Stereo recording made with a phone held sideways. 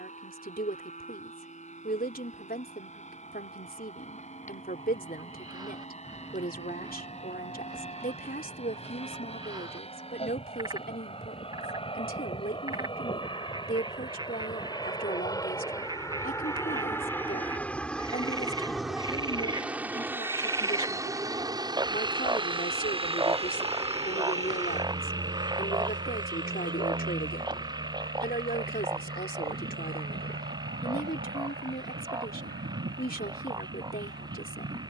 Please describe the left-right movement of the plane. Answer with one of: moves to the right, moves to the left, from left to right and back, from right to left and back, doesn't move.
moves to the right.